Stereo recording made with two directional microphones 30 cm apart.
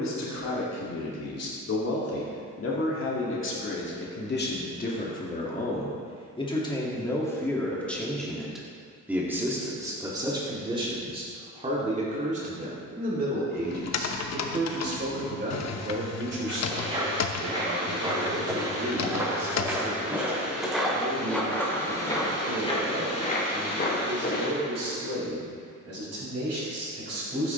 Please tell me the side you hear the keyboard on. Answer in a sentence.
In this clip you hear the keyboard on the left.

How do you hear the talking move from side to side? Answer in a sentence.
You can hear the talking move to the right.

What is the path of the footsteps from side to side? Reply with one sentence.
In this clip you hear the footsteps go from the right side to the left.